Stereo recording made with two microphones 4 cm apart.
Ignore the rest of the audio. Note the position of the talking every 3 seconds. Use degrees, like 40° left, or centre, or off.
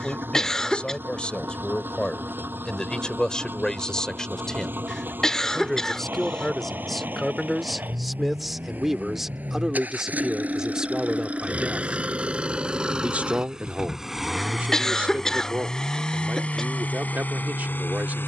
20° left, 10° left, centre, 20° right, 40° right, 50° right.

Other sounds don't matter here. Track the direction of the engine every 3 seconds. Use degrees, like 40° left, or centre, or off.
50° right, 50° right, 40° right, 30° right, 10° right, 30° left.